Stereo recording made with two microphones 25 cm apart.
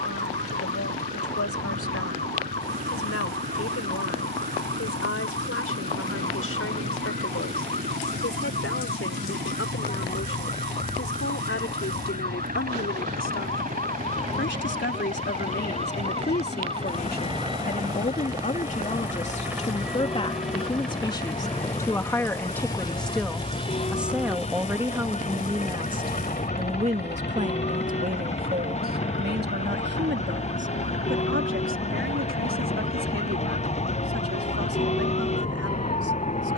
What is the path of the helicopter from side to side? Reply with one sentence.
In this clip you hear the helicopter move to the left.